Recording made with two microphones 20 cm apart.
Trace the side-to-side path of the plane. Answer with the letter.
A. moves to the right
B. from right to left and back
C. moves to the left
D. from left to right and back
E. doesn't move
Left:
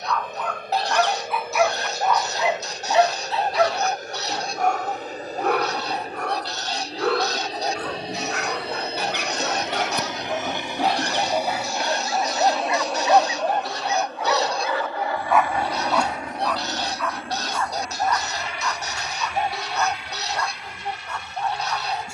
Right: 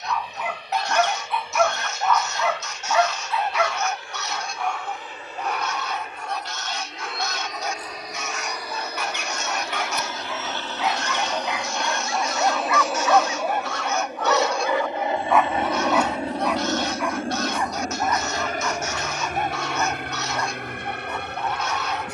A.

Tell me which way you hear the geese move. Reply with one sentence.
In this clip you hear the geese stay put.